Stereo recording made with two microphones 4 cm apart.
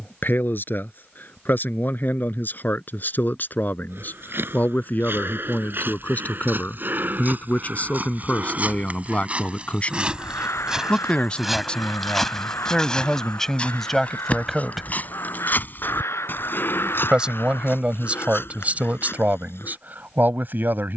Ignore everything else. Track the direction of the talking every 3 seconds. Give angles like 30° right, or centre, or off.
50° left, 50° left, 40° left, 30° left, 10° left, 20° right, 40° right.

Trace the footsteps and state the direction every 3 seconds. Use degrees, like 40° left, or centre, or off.
off, 60° right, 50° right, 20° right, 20° left, 50° left, 60° left.